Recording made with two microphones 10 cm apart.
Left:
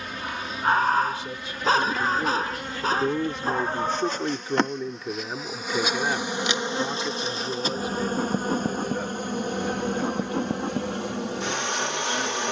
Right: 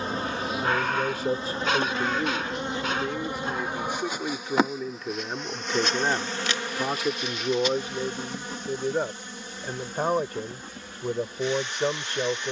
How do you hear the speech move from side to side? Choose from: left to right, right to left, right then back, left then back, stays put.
left then back.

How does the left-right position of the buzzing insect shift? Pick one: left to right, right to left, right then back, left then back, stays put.
right to left.